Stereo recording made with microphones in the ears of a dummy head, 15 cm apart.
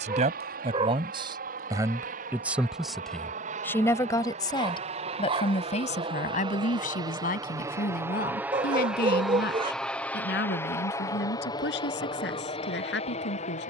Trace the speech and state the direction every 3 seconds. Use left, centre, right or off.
right, left, left, left, left.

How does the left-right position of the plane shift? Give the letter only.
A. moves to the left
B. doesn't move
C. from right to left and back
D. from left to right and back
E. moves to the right
A.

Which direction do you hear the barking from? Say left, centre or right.
right.